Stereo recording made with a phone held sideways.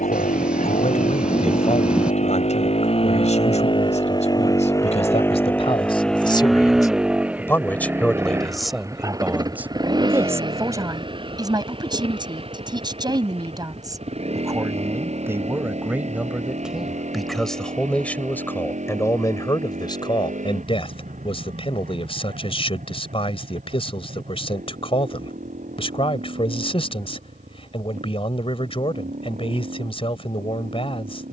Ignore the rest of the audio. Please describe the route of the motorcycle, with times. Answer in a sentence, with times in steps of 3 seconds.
In this clip you hear the motorcycle on the left from 0 s, in the centre from 6 s and on the right from 9 s.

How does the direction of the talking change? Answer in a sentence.
You can hear the talking move from left to right and back again.